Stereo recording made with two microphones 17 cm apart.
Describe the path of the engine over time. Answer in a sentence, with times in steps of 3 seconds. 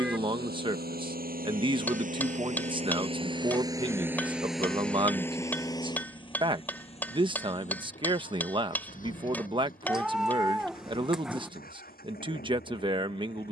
You can hear the engine on the right from 0 s, in the centre from 3 s and on the left from 6 s.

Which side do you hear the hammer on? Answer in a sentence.
In this clip you hear the hammer in the centre.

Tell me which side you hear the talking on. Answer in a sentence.
In this clip you hear the talking on the right.